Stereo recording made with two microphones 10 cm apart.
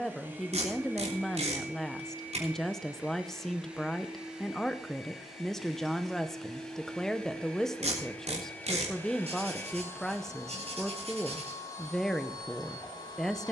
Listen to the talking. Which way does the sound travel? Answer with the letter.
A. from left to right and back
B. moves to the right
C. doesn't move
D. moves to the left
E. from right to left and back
C.